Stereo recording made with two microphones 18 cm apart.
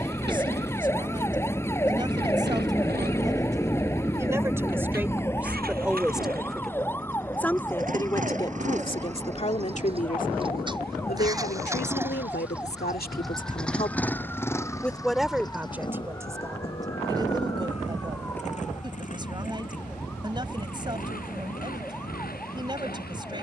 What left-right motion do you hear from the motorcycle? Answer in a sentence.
You can hear the motorcycle travel towards the left.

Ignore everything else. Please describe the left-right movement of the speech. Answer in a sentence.
You can hear the speech go left and come back.